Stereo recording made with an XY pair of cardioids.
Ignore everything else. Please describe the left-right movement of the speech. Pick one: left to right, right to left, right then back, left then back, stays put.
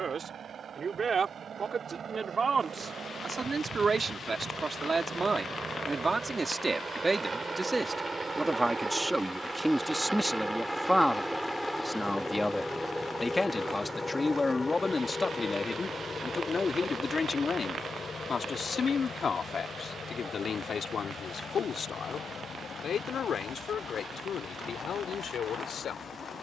right to left.